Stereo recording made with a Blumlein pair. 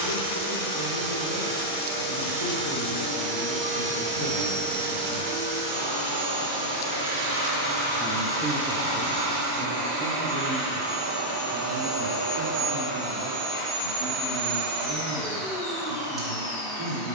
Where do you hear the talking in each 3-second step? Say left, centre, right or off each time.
left, left, centre, right, right, right.